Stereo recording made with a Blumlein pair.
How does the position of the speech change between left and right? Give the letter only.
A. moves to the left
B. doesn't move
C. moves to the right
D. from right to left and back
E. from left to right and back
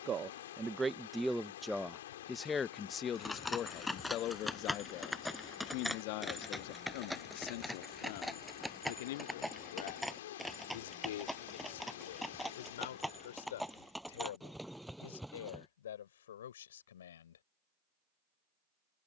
A.